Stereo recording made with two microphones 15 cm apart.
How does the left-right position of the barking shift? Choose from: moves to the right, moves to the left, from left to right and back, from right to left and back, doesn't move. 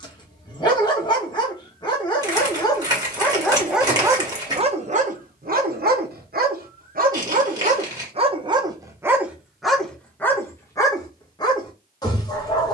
from left to right and back.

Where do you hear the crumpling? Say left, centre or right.
right.